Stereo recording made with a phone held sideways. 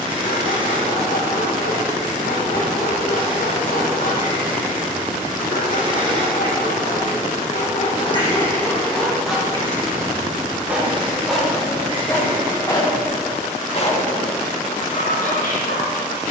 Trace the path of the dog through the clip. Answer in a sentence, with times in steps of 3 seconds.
In this clip you hear the dog on the left from 0 s, in the centre from 9 s and on the left from 12 s.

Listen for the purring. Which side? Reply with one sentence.
You can hear the purring on the right.